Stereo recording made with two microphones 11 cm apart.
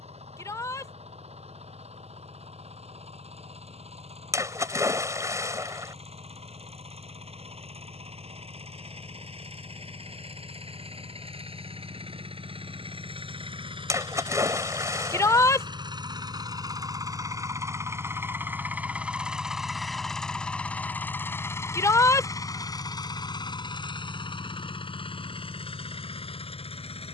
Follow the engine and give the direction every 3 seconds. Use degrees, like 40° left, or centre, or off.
70° right, 70° right, 70° right, 60° right, 50° right, 40° right, 10° right, 30° left, 50° left.